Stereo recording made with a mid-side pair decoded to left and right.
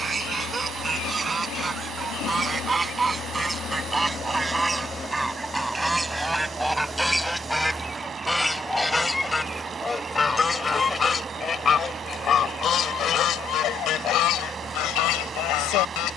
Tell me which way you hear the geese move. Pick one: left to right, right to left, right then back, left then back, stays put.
right to left.